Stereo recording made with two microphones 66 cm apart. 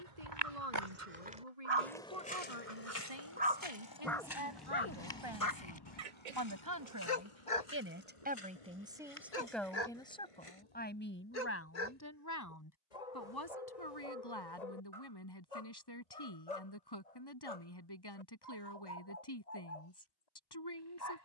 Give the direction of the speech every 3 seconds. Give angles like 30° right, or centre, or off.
60° right, 50° right, 20° right, 10° left, 30° left, 40° left, 40° left.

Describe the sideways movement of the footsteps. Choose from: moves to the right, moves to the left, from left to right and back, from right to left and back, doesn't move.
moves to the left.